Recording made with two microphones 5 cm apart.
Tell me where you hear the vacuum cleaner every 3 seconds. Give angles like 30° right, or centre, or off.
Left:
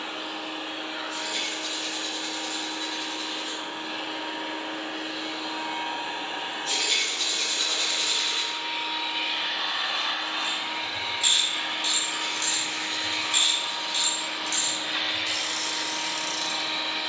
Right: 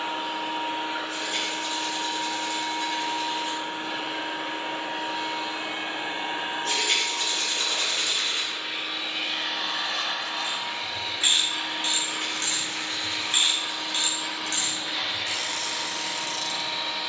50° right, 50° right, 20° right, 20° left, 40° left, 50° left.